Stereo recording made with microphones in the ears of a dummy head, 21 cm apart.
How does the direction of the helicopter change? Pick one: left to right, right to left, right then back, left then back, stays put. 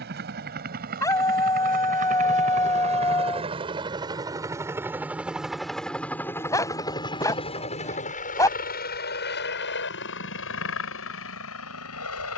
right to left.